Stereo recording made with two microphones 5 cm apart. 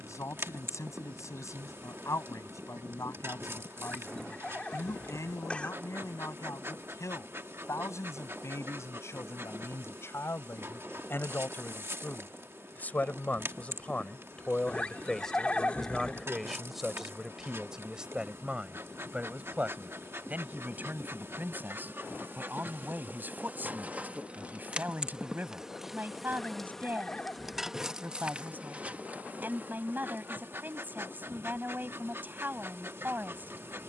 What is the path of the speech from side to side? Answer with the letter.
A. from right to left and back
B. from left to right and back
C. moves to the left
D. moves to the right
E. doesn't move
D.